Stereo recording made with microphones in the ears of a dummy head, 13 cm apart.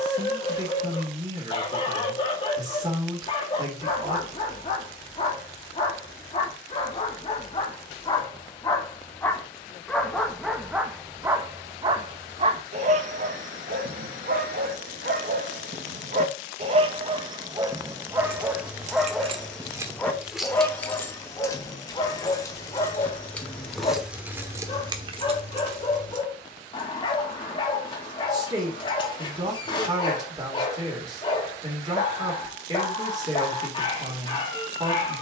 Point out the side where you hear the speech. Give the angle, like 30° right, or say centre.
30° right.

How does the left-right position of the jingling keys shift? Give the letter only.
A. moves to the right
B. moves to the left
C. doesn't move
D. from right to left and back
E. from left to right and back
D.